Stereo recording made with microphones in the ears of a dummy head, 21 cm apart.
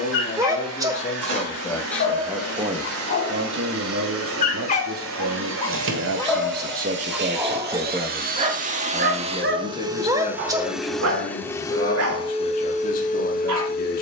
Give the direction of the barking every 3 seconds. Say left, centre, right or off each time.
left, left, centre, right, right.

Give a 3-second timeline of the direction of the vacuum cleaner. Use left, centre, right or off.
right, right, right, centre, left.